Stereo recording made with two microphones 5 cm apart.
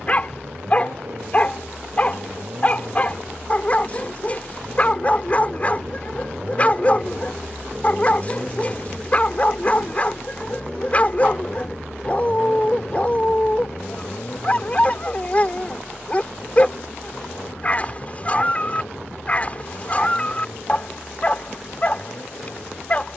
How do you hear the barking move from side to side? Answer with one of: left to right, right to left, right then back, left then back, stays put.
stays put.